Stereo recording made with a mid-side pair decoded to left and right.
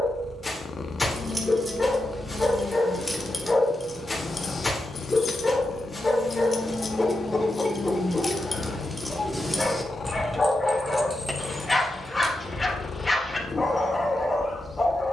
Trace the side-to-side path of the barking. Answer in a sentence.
You can hear the barking stay put.